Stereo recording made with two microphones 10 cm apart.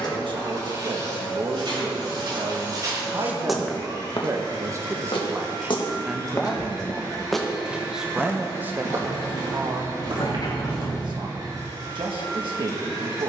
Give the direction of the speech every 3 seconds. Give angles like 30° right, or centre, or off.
50° right, 30° right, 10° right, 50° right, 60° right.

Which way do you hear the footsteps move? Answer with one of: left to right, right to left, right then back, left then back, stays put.
left then back.